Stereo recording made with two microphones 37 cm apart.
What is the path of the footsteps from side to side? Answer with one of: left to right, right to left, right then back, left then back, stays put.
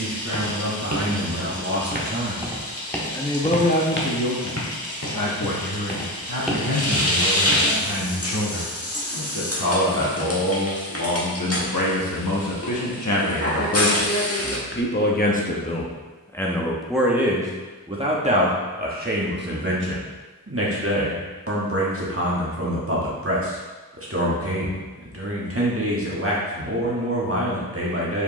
left then back.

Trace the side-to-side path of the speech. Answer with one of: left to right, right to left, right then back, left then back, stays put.
left then back.